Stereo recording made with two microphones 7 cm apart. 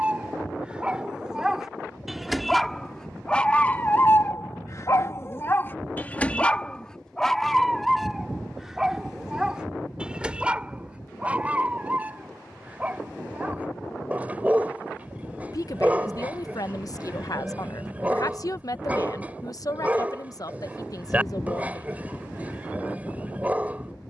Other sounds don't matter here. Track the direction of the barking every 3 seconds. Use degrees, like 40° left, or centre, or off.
10° right, 30° left, 10° left, 10° right, 20° right, 20° right, 20° right, 20° right.